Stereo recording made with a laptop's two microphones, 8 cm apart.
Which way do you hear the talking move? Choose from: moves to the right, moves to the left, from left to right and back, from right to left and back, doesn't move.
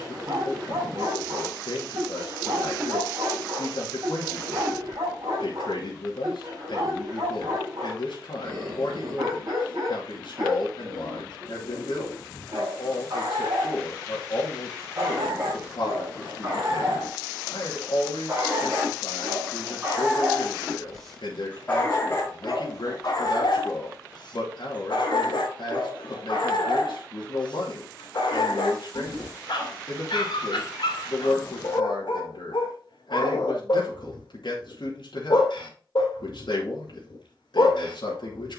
doesn't move.